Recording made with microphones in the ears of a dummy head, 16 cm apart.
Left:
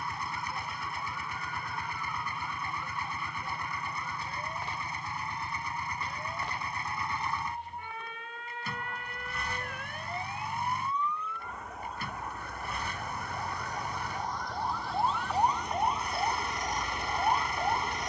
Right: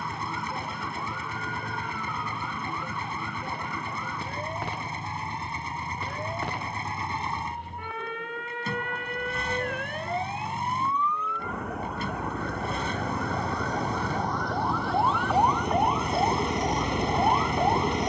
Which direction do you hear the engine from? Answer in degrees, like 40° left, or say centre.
20° right.